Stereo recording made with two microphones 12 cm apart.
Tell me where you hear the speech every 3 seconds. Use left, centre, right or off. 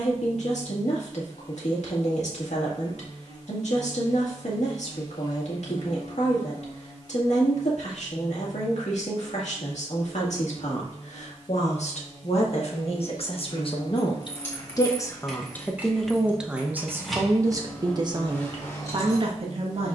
left, left, left, left, left, centre, right.